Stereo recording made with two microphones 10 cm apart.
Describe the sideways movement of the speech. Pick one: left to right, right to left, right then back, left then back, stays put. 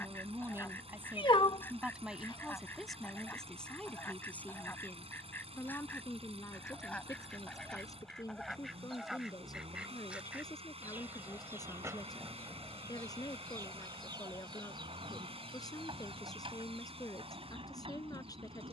right to left.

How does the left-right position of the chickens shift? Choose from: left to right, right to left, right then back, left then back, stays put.
left to right.